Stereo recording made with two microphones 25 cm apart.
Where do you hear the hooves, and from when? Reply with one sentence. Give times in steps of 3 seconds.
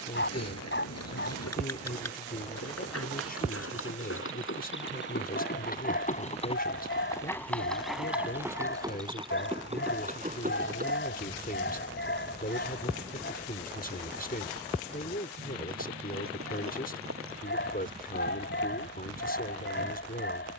You can hear the hooves on the left from 0 s, in the centre from 6 s and on the right from 9 s.